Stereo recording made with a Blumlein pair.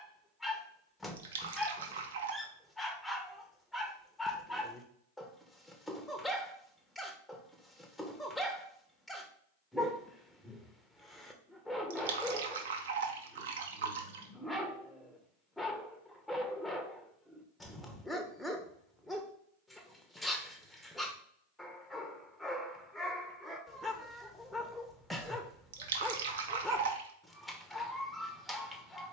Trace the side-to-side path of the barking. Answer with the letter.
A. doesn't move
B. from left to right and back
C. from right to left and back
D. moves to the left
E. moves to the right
A.